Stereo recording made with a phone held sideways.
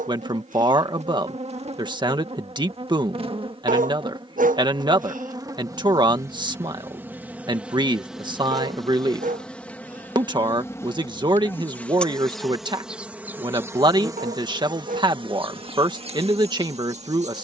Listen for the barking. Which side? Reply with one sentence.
You can hear the barking on the right.